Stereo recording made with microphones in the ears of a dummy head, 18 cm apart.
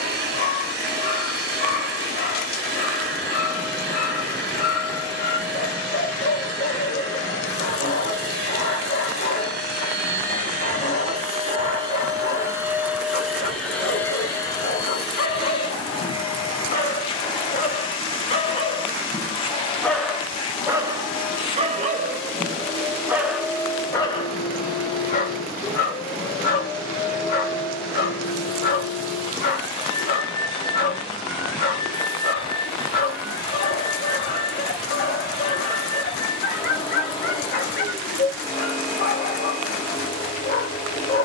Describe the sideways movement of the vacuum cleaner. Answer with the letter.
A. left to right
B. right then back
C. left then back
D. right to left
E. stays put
D.